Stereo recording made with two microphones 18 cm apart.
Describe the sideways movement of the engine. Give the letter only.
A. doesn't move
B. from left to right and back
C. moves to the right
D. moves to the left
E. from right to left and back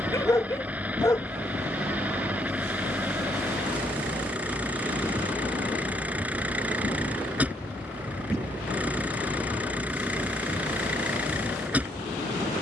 A.